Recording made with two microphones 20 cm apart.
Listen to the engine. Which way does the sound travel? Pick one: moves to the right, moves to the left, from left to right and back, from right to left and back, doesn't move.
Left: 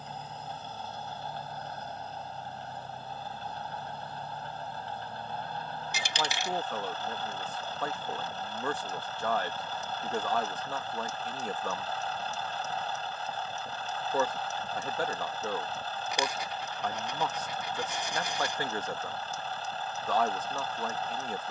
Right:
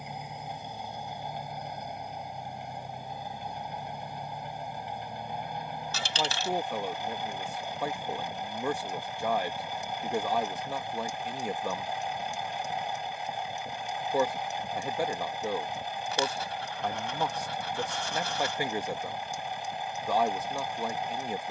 doesn't move.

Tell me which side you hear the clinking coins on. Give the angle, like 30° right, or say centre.
20° left.